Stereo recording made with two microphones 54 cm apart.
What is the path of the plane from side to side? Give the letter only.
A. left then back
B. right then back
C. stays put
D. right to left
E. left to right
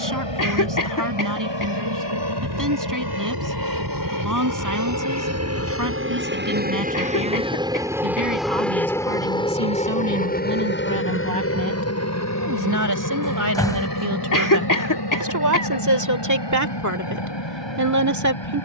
D.